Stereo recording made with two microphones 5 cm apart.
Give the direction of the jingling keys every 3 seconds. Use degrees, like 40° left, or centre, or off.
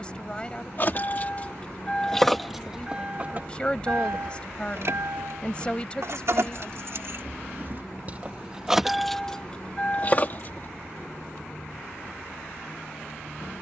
20° left, 50° right, 40° right, 30° left, off.